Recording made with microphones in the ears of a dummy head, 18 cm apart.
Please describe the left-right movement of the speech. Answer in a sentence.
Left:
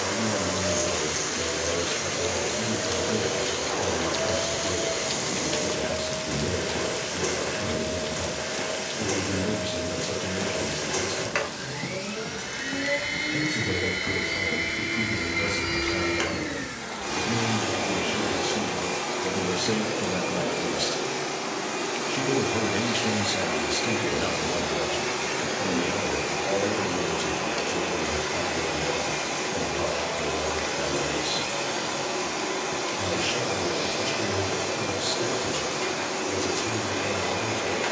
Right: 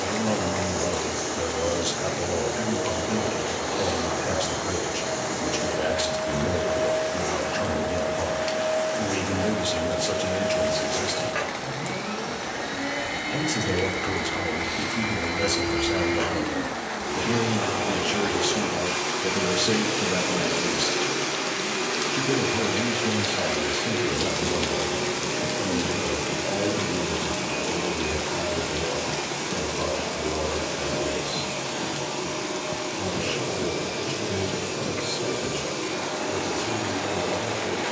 In this clip you hear the speech move to the left.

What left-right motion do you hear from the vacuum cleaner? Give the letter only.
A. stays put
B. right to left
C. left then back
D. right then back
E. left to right
D.